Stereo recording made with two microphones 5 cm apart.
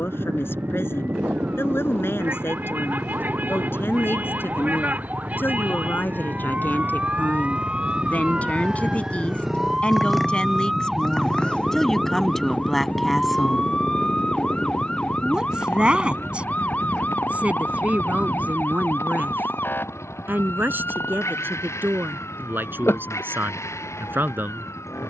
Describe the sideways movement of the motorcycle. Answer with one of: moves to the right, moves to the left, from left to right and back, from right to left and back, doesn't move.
moves to the left.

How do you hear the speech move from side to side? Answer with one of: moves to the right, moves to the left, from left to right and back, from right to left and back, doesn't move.
moves to the right.